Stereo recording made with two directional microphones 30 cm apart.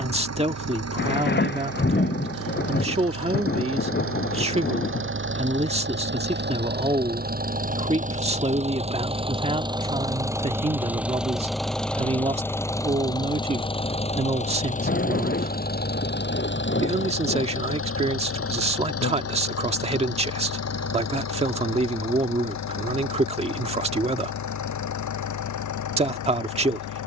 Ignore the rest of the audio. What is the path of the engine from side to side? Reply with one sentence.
You can hear the engine go from the right side to the left.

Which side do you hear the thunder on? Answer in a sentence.
In this clip you hear the thunder on the left.